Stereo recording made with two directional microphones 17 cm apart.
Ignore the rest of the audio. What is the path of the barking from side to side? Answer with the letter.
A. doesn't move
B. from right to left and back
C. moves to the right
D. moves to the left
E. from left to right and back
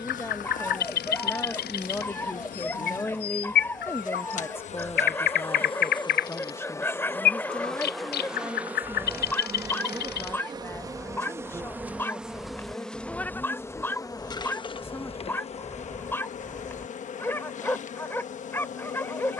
A.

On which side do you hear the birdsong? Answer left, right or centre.
left.